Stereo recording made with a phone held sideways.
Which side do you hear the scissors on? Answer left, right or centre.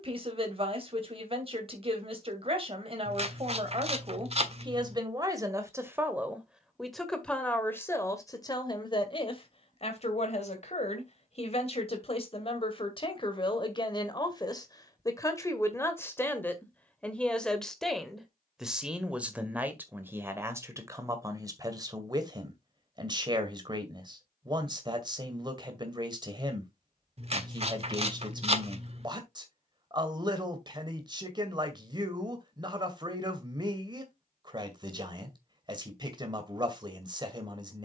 right.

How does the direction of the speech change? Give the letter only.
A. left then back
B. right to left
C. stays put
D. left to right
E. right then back
A.